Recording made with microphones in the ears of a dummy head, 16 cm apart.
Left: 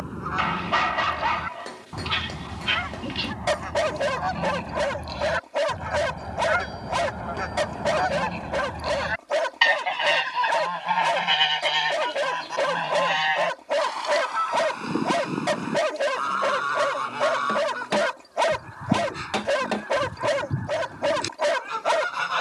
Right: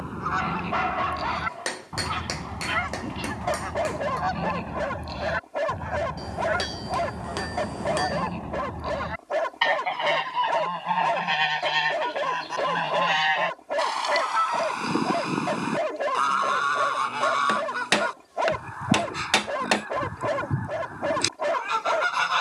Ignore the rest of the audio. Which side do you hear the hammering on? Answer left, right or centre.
right.